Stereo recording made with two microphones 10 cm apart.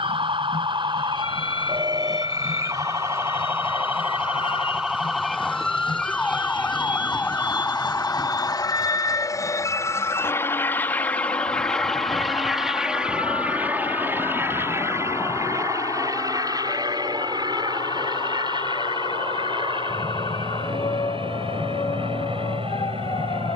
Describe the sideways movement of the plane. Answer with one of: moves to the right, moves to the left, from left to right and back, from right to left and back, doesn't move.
moves to the right.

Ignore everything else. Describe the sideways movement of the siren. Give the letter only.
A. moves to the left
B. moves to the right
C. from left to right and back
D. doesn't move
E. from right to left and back
A.